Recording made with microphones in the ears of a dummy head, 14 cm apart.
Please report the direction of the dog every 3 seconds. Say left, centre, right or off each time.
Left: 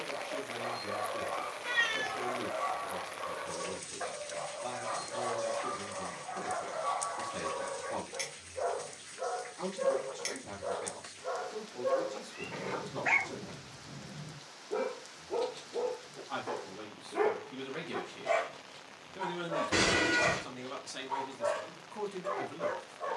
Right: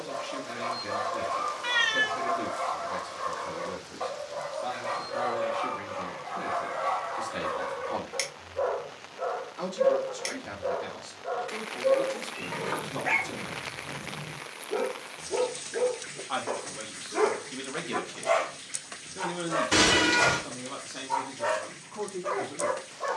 right, right, right, centre, left, centre, right, right.